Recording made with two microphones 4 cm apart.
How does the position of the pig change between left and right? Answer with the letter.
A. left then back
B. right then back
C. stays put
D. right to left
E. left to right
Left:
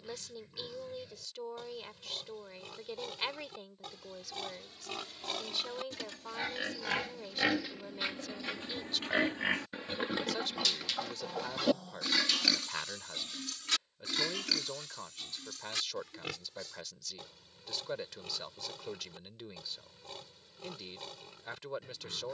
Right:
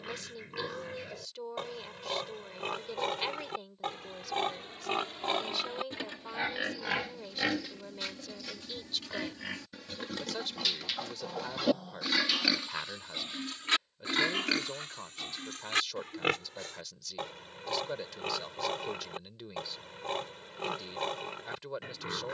A.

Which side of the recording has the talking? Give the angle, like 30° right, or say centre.
centre.